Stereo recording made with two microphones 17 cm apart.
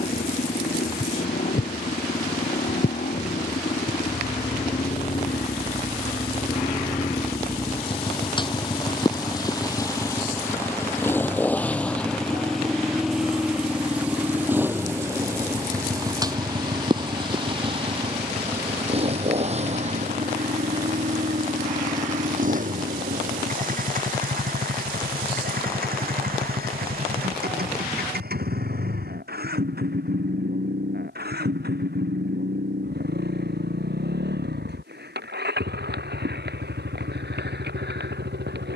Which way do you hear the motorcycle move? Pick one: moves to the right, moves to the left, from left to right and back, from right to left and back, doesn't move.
moves to the right.